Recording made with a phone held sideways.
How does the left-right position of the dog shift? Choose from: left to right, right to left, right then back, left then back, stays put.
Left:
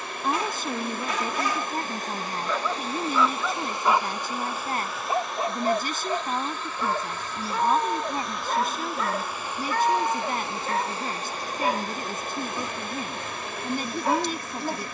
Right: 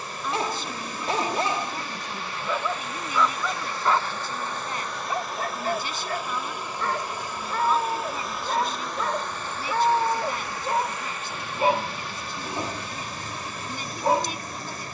left then back.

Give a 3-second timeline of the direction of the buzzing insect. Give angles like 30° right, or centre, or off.
50° left, 10° left, 10° right, 30° left, 60° left.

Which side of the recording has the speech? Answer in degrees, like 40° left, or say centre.
50° left.